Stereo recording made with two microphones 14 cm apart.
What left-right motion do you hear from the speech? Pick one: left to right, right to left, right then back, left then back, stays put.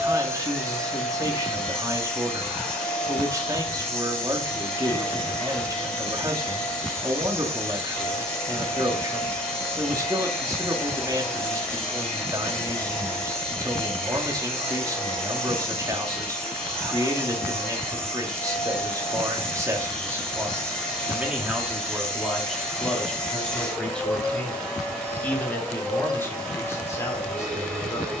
right to left.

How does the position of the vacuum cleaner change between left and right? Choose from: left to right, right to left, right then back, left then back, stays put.
stays put.